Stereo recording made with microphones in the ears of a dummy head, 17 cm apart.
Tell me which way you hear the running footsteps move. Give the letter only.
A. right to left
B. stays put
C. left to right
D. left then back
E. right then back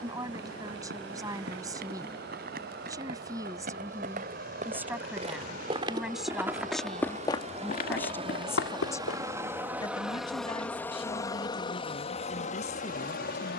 A.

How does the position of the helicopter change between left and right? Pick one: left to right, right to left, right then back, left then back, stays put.
right to left.